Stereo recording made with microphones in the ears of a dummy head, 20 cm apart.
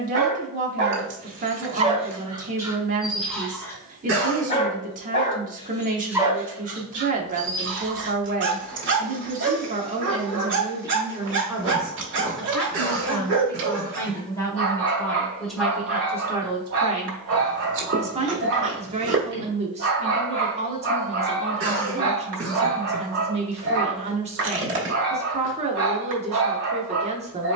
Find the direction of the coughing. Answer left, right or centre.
right.